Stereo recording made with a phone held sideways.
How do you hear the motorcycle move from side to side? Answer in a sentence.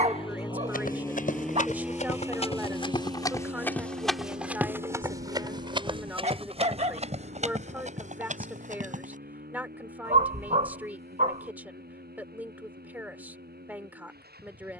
In this clip you hear the motorcycle move to the right.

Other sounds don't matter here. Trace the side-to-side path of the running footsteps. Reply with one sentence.
You can hear the running footsteps go from the left side to the right.